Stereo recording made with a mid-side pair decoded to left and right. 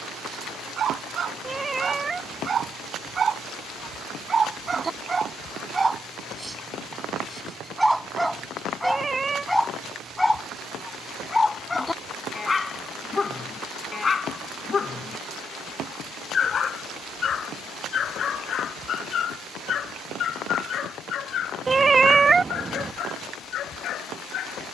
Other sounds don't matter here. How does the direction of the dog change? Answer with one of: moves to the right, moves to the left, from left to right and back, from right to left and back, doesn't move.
moves to the left.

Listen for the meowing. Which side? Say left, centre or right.
right.